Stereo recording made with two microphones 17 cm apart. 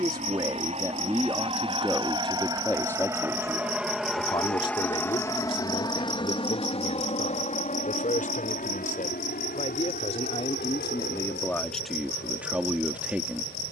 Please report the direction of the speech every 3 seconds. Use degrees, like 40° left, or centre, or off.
10° right, 30° left, 50° left, 30° left, 10° right.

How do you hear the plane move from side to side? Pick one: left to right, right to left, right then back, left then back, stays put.
right to left.